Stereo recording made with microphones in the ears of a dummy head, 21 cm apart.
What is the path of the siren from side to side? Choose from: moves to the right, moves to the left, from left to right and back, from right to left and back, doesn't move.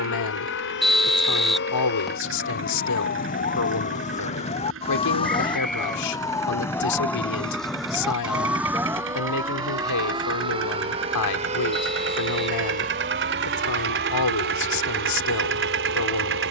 moves to the right.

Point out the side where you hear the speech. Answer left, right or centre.
left.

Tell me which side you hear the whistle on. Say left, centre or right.
centre.